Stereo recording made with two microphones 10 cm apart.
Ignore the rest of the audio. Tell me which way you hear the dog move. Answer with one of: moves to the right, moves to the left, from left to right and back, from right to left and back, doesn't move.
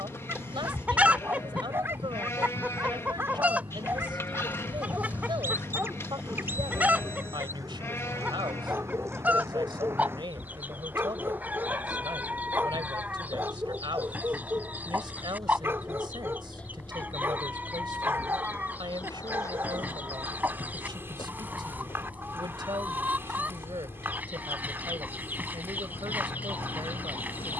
doesn't move.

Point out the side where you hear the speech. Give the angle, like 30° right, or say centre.
50° right.